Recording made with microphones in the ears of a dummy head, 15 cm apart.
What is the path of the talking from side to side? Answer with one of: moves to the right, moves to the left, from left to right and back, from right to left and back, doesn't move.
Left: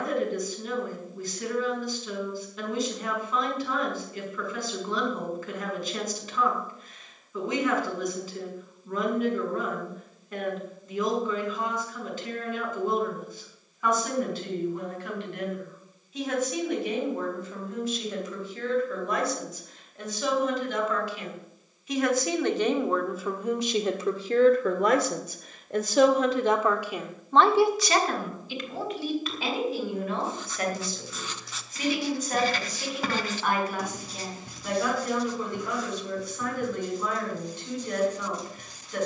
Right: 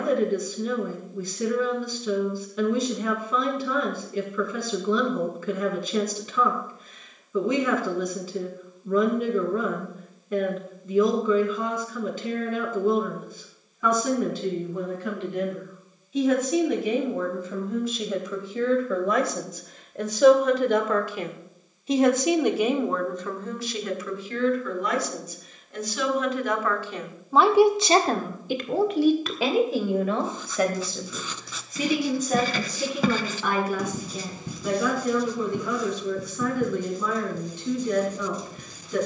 from right to left and back.